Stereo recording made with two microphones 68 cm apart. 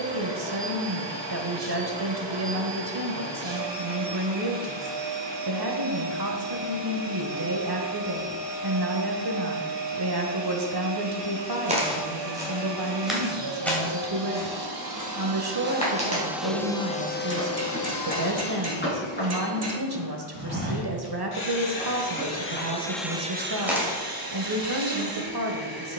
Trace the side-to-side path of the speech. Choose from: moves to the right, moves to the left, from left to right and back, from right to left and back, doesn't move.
doesn't move.